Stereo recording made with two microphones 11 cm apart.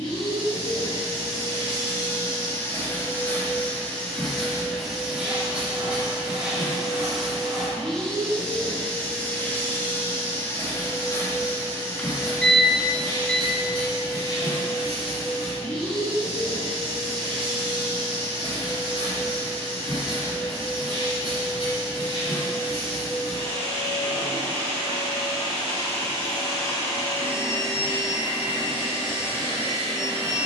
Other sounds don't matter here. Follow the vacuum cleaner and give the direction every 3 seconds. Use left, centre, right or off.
left, centre, centre, left, left, left, left, left, left, left.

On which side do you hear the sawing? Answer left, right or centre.
right.